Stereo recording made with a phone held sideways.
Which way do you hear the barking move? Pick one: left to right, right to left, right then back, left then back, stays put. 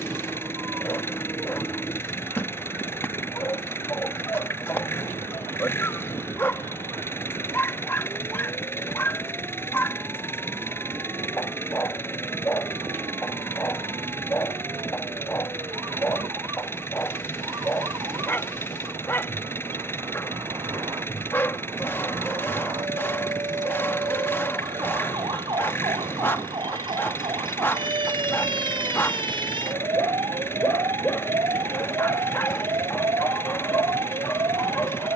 stays put.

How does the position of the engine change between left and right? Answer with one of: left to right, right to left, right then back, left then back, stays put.
stays put.